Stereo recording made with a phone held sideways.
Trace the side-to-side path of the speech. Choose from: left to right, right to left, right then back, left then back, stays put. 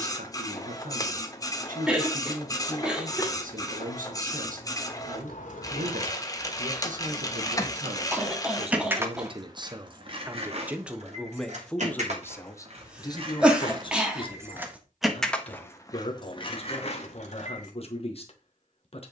right to left.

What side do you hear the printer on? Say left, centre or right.
left.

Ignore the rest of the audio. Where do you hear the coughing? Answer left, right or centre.
centre.